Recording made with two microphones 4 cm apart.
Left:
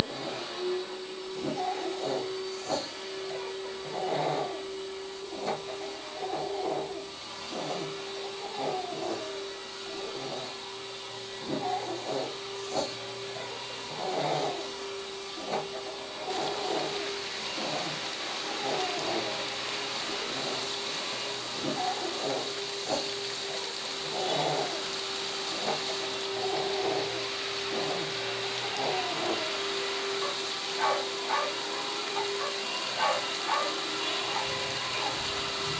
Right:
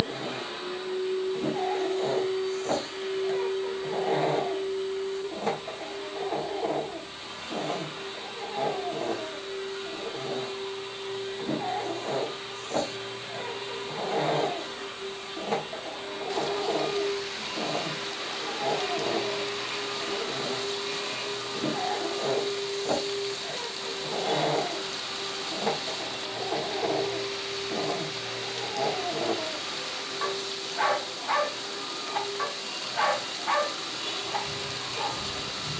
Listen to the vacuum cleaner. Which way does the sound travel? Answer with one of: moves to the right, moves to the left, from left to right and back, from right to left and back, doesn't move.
moves to the left.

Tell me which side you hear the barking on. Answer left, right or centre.
right.